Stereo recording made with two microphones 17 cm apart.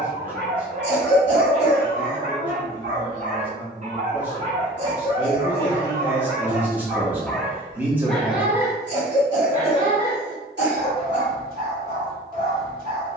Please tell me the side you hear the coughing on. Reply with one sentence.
You can hear the coughing on the right.